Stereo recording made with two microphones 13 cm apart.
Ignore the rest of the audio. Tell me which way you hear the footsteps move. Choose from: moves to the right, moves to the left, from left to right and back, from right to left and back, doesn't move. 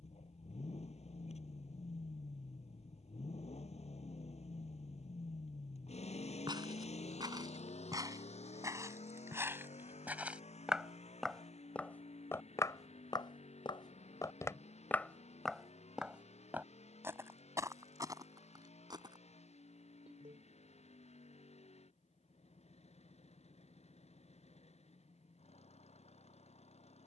from right to left and back.